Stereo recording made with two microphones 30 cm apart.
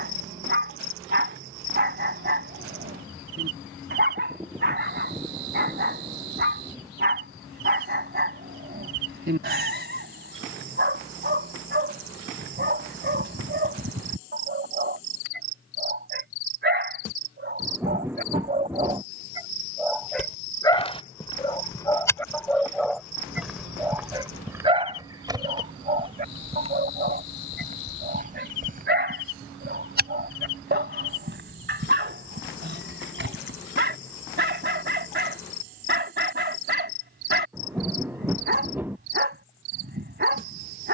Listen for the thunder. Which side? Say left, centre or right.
centre.